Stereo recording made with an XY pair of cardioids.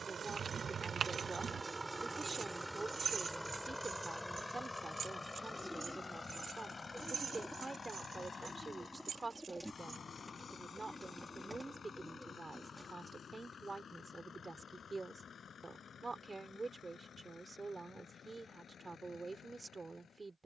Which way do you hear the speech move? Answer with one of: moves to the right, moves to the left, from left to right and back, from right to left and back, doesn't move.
doesn't move.